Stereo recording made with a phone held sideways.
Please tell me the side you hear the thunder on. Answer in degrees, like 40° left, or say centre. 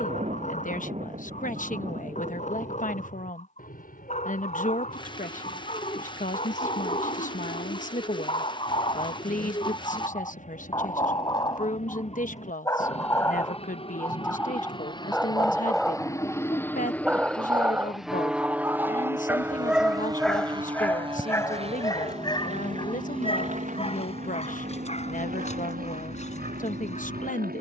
50° right.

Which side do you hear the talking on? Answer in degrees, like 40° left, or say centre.
60° left.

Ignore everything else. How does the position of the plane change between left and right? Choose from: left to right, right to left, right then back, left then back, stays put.
left to right.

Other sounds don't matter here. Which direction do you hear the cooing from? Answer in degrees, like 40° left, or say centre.
30° left.